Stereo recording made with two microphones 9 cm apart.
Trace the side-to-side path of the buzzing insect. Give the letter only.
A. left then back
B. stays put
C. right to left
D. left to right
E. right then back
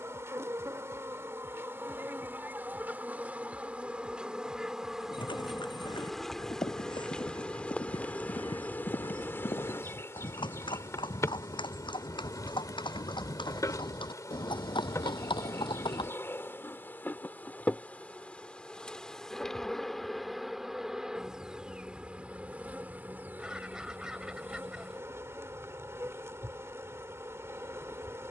A.